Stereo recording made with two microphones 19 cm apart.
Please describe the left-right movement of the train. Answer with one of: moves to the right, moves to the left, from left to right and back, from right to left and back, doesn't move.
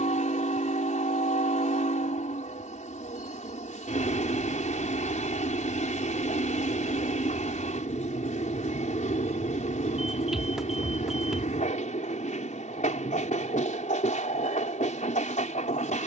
doesn't move.